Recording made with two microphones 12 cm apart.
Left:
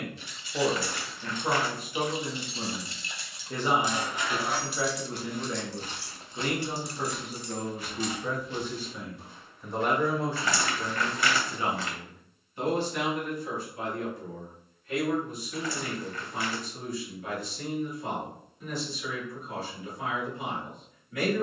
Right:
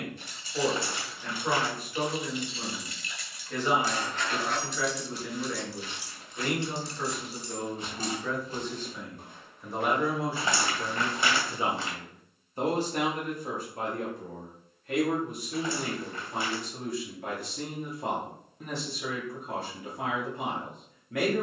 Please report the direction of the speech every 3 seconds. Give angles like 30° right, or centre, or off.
20° left, 20° left, 20° left, 10° right, 40° right, 60° right, 60° right.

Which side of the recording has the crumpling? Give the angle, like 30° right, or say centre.
20° right.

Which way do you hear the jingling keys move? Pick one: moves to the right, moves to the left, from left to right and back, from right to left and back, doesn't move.
from right to left and back.